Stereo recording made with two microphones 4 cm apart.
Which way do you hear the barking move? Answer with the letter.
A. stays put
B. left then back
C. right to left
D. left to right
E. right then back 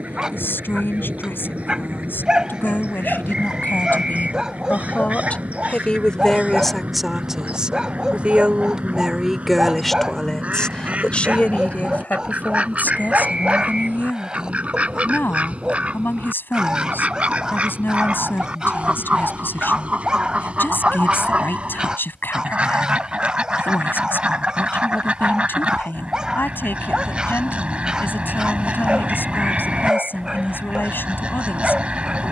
A.